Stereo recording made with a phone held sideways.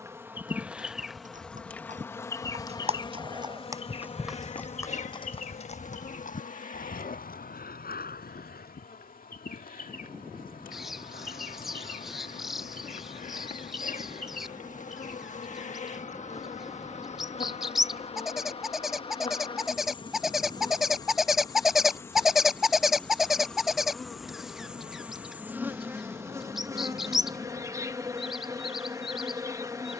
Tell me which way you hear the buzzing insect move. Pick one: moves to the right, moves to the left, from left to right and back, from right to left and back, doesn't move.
from right to left and back.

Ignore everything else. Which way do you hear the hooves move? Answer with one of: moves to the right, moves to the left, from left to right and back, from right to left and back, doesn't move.
moves to the left.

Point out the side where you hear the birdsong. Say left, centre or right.
centre.